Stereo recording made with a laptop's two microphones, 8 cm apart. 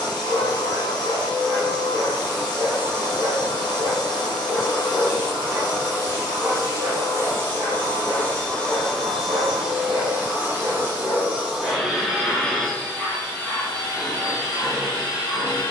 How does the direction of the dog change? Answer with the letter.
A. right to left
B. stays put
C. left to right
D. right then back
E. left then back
A.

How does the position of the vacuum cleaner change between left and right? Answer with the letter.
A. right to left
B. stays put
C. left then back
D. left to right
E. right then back
E.